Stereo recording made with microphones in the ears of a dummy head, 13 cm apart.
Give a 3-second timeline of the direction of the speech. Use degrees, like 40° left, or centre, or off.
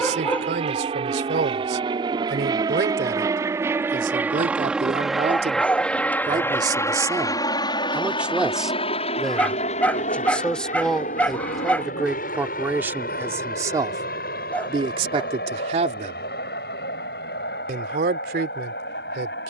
80° right, 50° right, 20° right, centre, 20° right, 50° right, 70° right.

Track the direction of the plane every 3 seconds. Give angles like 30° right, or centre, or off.
40° right, 10° right, 30° left, 50° left, 60° left, 70° left, 70° left.